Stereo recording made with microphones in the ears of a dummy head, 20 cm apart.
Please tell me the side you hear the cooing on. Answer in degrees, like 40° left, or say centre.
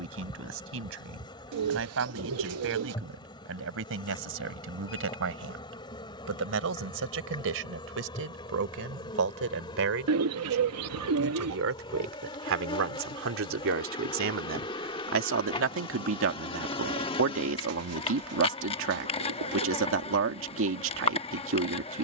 80° right.